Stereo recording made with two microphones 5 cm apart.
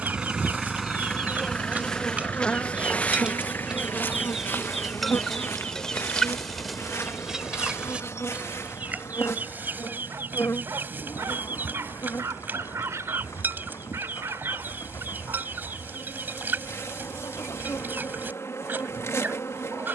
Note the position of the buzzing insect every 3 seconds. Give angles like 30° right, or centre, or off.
centre, 50° left, 60° left, 70° left, 70° left, 70° left, 70° left.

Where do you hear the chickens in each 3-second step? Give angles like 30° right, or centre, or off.
30° right, centre, 10° right, 40° right, 40° right, 40° right, 40° right.